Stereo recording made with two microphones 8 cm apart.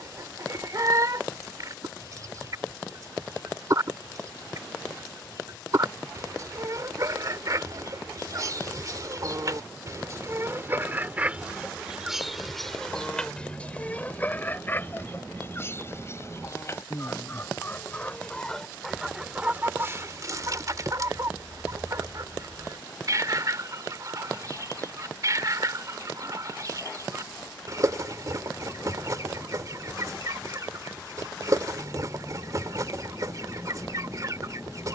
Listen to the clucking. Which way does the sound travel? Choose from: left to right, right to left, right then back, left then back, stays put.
left then back.